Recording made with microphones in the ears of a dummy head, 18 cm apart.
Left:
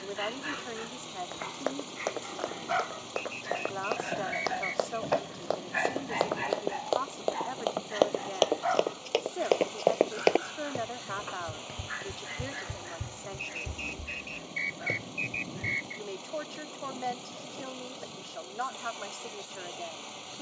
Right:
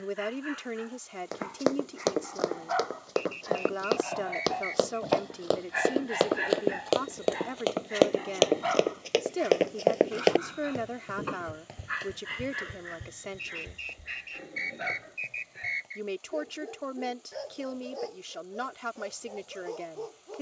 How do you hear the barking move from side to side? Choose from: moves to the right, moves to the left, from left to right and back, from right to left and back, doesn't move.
moves to the right.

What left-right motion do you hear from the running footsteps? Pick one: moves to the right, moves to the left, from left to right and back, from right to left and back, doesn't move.
moves to the left.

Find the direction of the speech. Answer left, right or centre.
right.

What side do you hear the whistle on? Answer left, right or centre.
centre.